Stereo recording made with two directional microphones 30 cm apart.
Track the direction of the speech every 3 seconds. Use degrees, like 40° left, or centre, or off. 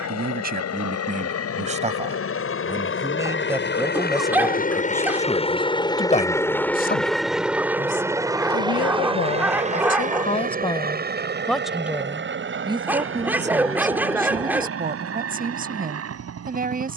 20° right, centre, 40° left, 20° left, 20° right, 30° right.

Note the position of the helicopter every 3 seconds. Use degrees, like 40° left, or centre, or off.
50° left, 30° left, centre, 30° right, 40° right, 50° right.